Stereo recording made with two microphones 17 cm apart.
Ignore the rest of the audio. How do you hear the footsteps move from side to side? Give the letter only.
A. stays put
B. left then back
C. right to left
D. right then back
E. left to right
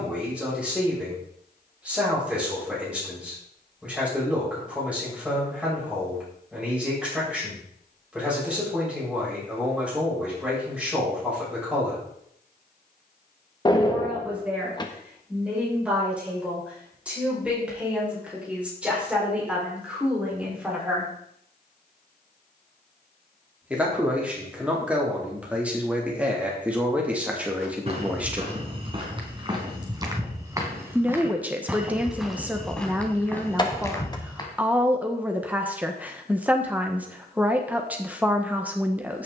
C.